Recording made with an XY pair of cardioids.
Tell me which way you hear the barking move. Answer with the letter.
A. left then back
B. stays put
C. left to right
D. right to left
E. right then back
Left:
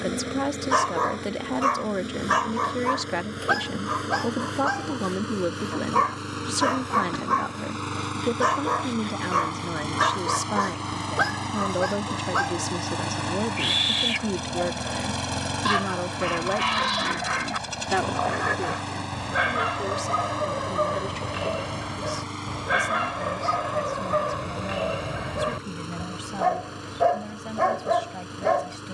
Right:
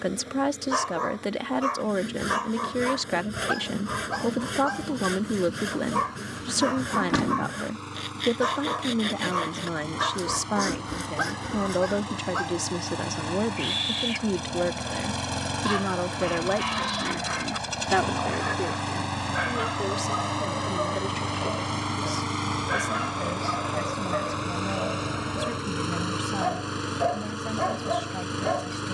B.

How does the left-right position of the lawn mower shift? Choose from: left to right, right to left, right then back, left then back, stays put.
left to right.